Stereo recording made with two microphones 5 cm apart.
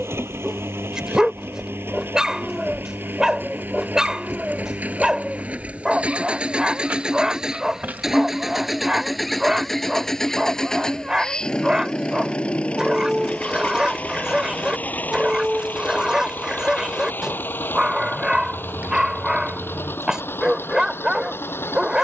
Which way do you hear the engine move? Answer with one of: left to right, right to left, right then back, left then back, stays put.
right to left.